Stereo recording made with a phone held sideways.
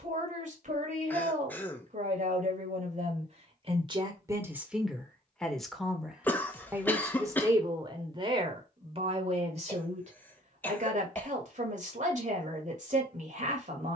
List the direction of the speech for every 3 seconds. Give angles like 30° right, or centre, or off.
50° right, 20° right, 20° right, 50° right, 50° right.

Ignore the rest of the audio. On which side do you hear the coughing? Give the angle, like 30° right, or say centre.
10° left.